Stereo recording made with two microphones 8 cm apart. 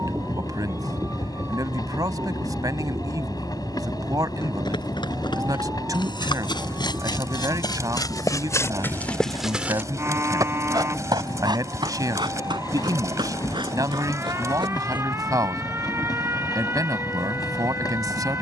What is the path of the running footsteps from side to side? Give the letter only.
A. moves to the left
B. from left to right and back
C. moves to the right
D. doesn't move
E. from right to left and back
C.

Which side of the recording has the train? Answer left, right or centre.
left.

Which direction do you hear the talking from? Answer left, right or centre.
right.